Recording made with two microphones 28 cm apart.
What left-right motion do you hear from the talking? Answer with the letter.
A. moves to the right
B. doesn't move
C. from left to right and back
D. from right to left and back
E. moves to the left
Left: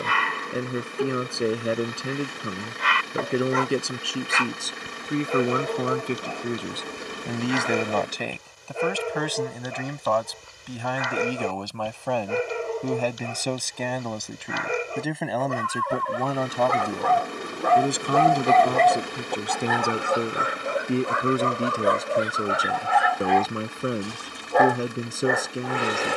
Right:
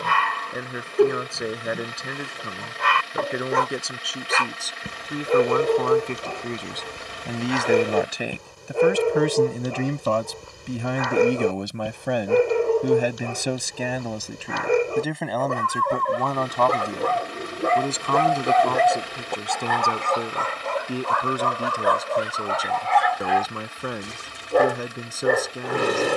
C.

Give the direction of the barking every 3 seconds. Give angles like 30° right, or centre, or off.
60° right, 60° right, 60° right, 60° right, 60° right, 40° right, centre, 20° left, 40° right.